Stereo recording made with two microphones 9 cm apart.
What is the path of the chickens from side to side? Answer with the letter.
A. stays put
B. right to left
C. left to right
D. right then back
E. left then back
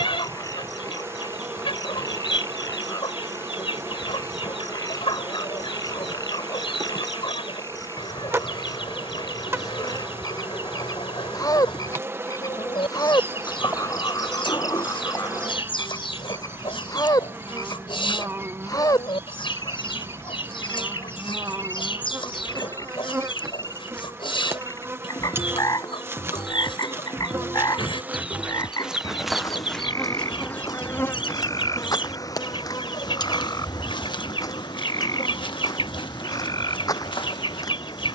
A.